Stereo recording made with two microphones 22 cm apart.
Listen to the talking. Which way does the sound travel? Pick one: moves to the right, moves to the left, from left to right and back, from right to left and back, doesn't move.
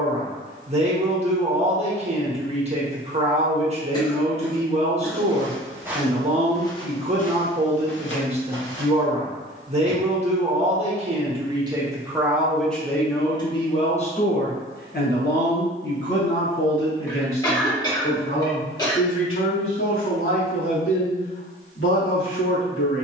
moves to the left.